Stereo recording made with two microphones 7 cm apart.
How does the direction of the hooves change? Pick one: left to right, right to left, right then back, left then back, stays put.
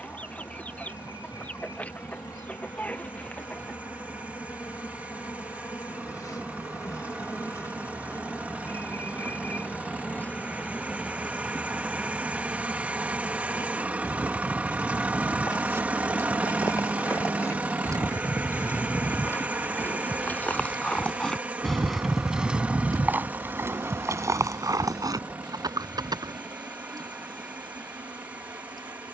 left to right.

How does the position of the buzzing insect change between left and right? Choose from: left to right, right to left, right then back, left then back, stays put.
left to right.